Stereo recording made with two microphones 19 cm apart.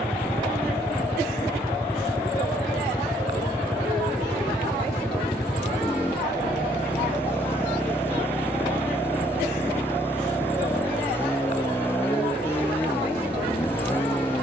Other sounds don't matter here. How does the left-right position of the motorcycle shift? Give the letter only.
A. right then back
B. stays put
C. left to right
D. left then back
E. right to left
B.